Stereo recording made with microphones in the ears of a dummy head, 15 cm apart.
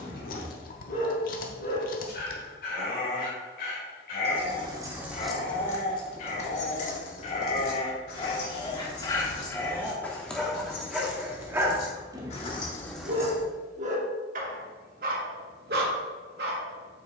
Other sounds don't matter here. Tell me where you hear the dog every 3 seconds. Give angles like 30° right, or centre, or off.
60° left, 50° left, 30° left, centre, 40° right, 60° right.